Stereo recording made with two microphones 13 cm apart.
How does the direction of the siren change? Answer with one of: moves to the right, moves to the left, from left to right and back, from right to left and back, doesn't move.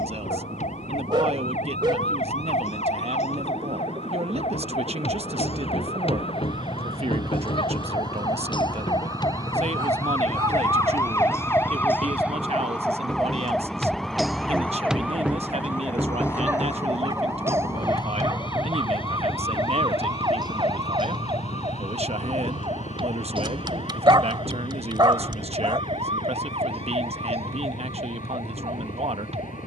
moves to the right.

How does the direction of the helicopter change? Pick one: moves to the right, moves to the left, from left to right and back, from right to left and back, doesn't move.
moves to the left.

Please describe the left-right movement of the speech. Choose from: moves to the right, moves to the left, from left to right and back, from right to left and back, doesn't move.
doesn't move.